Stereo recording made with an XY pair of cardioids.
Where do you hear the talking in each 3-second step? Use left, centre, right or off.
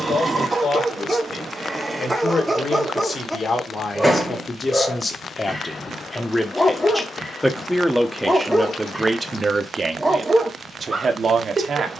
left, left, centre, right.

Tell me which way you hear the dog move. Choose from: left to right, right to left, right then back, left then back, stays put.
left then back.